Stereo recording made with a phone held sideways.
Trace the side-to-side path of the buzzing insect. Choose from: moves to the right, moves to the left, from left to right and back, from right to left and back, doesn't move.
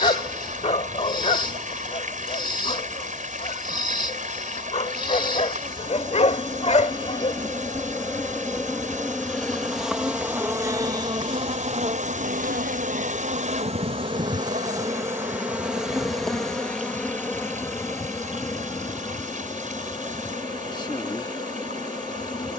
from left to right and back.